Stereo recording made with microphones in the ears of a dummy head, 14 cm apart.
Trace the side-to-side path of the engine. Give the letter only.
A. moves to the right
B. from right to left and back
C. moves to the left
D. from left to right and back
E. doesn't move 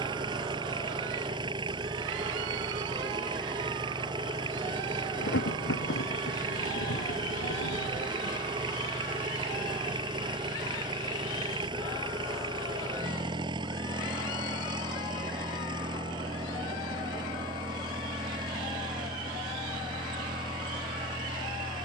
E.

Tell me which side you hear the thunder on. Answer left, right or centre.
left.